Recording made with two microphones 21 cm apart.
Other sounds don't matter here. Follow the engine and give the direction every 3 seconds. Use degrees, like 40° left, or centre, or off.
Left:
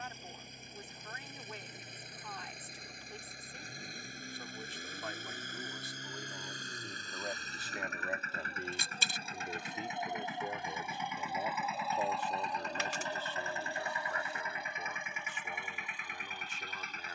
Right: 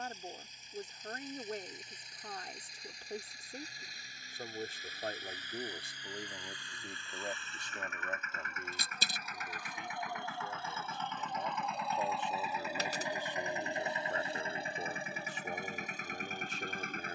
60° left, 50° left, 40° left, 20° left, 20° right, 40° right.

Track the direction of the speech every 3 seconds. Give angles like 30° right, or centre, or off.
40° right, 40° right, centre, 30° left, 20° right, 40° right.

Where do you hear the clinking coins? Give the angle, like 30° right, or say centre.
40° right.